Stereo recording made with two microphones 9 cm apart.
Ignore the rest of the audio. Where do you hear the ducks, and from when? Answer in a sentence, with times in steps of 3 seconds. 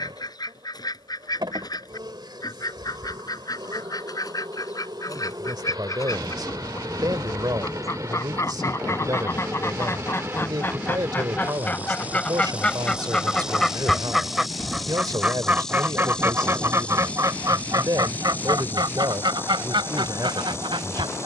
In this clip you hear the ducks on the left from 0 s, in the centre from 12 s and on the right from 15 s.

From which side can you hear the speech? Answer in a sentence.
You can hear the speech on the right.